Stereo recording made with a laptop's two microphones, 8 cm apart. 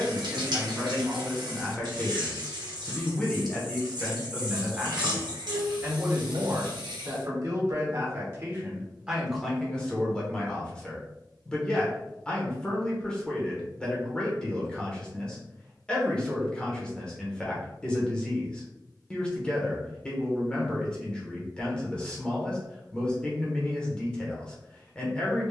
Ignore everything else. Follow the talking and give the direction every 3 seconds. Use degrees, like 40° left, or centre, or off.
10° left, centre, 30° right, 10° left, 10° left, 10° left, 10° left, 10° left, 10° left.